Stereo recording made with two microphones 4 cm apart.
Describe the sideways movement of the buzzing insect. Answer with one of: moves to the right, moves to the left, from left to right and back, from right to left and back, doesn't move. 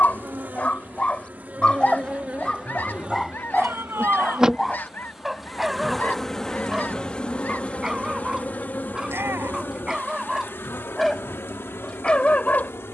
moves to the left.